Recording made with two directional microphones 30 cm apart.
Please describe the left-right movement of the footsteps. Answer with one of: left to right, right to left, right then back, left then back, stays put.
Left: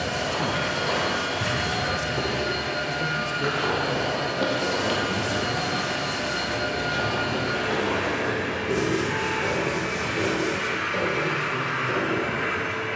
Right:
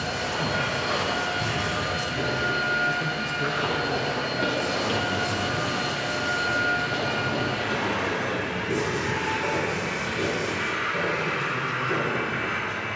right then back.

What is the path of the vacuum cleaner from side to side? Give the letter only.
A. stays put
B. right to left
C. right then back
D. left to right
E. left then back
A.